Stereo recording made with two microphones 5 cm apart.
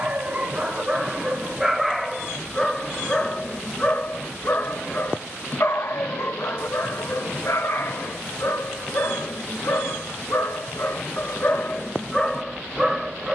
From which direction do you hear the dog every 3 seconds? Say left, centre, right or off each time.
centre, left, left, left, centre.